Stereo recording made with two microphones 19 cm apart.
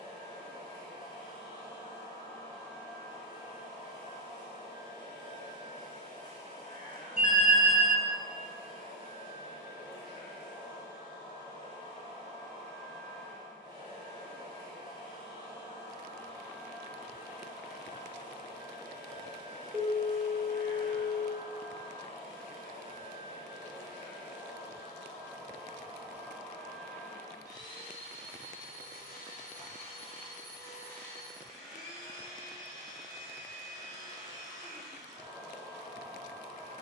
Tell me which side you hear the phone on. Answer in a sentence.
In this clip you hear the phone in the centre.